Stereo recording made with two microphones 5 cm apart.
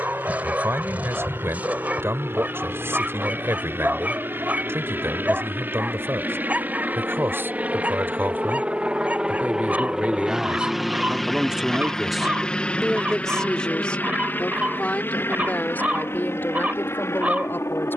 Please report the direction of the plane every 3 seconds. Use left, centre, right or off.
right, right, right, centre, left, left.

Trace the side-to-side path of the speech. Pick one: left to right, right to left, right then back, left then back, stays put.
right to left.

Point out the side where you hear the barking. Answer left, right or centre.
right.